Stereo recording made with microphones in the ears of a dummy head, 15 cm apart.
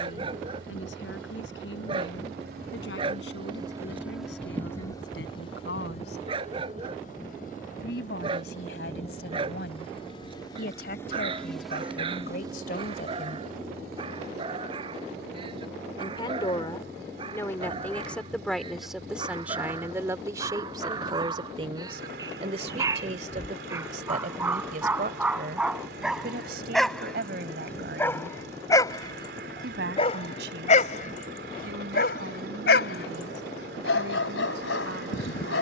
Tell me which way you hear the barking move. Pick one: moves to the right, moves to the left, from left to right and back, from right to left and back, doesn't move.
moves to the left.